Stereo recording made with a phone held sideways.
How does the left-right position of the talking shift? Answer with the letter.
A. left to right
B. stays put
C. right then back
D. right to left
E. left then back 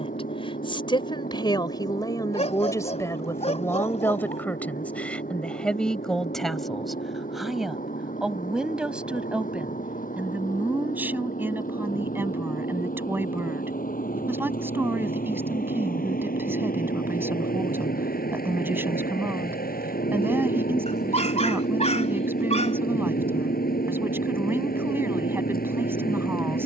A.